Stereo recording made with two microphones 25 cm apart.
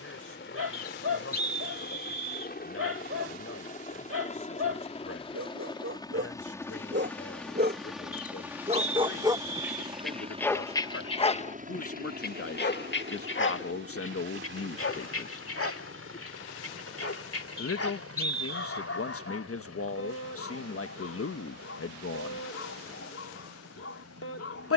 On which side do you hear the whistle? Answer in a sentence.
In this clip you hear the whistle on the right.